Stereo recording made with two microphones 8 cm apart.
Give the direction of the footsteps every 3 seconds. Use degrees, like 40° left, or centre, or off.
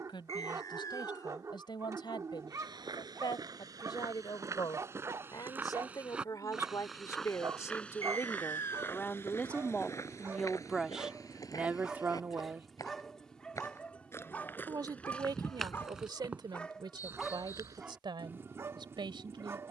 60° right, 40° right, 10° left, 40° left, 30° left, 20° right, off.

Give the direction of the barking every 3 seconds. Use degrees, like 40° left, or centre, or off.
40° right, 40° right, 40° right, 20° right, 10° left, 10° left, 30° right.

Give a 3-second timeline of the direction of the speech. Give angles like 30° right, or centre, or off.
70° left, 60° left, 40° left, centre, 30° right, 60° right, 70° right.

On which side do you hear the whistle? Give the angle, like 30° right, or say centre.
40° left.